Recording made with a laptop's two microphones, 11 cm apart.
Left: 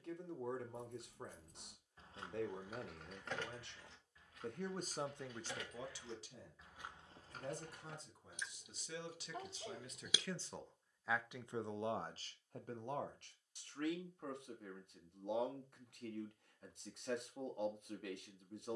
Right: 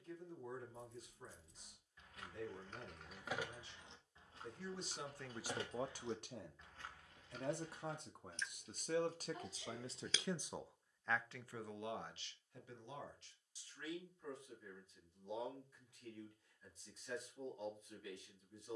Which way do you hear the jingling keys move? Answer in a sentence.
You can hear the jingling keys move from left to right and back again.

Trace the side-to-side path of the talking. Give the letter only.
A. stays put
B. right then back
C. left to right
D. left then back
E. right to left
B.